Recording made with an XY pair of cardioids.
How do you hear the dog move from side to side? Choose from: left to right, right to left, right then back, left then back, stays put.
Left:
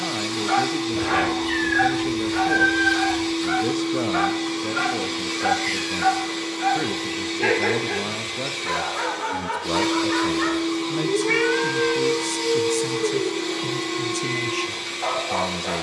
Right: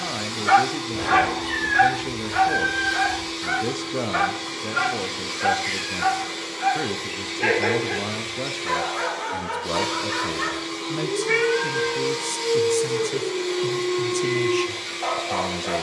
right to left.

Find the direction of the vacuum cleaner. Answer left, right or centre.
left.